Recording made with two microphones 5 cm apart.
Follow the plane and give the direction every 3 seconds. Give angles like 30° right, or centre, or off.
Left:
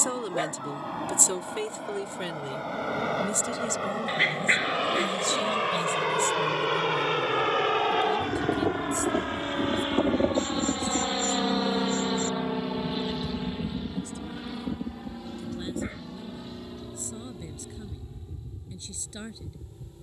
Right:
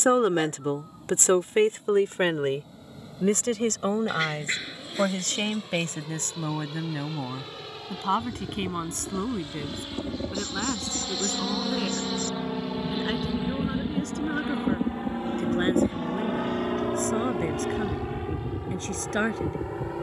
70° left, 70° left, 60° left, 30° left, 10° right, 40° right, 60° right.